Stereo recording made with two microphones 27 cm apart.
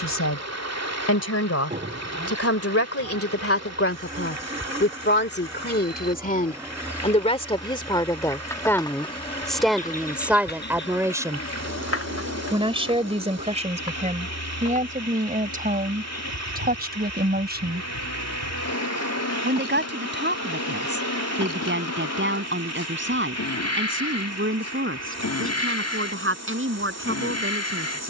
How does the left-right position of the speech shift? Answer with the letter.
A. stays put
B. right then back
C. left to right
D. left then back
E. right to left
C.